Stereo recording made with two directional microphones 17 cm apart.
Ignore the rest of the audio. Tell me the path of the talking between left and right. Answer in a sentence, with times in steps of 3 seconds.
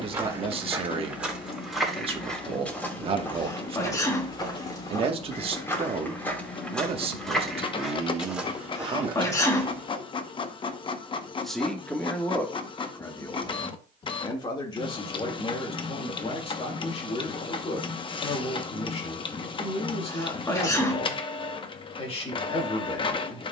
In this clip you hear the talking on the right from 0 s, in the centre from 9 s and on the left from 12 s.